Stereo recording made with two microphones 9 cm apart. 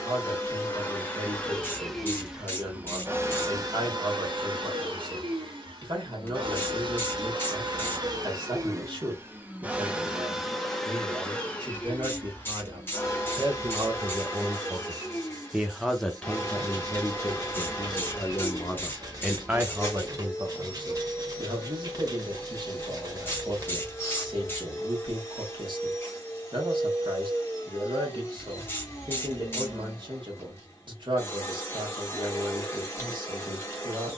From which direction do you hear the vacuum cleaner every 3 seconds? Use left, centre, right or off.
centre, right, right, centre, left, left, left, left, left, left, left, left.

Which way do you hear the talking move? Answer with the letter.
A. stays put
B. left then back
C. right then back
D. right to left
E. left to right
B.